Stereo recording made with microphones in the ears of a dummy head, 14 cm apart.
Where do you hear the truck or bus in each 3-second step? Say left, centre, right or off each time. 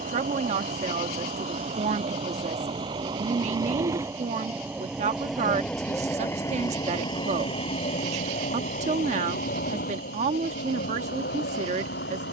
right, centre, left, left.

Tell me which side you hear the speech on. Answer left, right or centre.
right.